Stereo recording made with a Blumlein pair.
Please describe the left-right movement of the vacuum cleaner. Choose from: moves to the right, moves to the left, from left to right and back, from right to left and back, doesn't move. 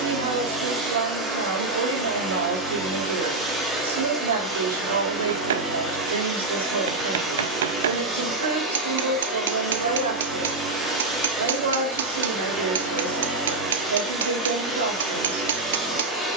doesn't move.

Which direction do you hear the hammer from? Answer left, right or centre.
right.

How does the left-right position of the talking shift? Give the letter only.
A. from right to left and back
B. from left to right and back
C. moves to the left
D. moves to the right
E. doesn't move
E.